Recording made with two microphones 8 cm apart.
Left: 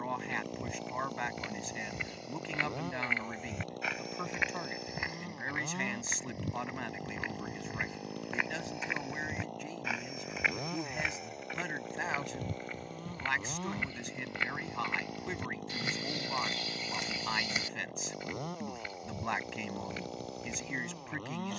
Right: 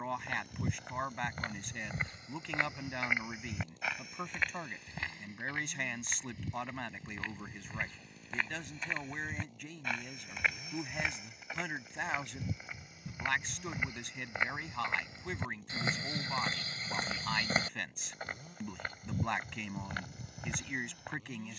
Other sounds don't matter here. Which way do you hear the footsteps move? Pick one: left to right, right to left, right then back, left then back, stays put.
left then back.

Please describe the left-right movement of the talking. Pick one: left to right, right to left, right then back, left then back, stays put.
stays put.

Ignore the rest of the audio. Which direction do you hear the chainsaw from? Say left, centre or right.
left.